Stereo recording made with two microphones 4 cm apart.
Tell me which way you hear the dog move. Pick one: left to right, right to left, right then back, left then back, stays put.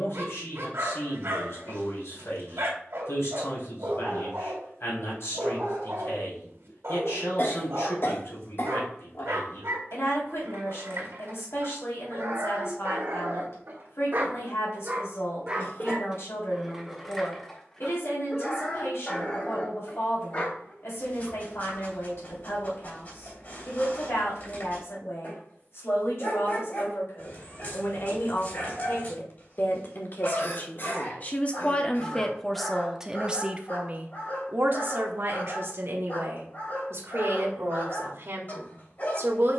right to left.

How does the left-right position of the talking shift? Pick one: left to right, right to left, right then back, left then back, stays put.
left to right.